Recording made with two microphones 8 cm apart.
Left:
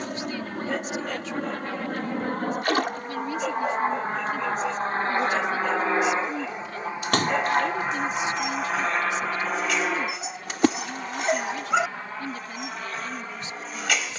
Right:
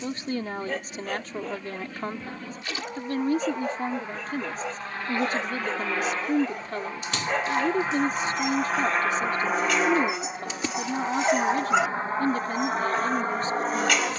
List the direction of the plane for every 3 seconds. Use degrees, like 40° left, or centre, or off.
60° left, 40° left, 10° left, 20° right, 40° right.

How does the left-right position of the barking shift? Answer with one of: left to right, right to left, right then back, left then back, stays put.
stays put.